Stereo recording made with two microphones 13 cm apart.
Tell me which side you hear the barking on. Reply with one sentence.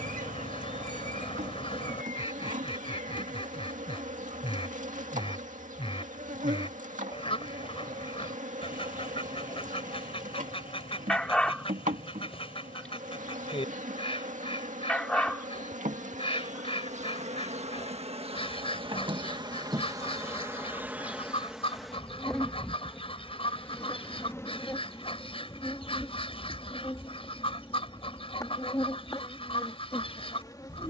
You can hear the barking in the centre.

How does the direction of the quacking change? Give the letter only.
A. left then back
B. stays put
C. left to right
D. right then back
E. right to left
B.